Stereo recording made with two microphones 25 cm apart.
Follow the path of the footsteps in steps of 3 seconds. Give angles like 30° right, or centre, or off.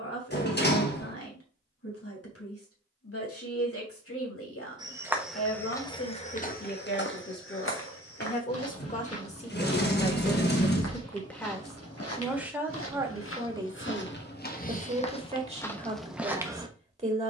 off, centre, 50° left, 70° left, 50° left, centre.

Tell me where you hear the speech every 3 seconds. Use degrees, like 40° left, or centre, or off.
60° left, 60° left, 40° left, 10° left, 20° right, 20° right.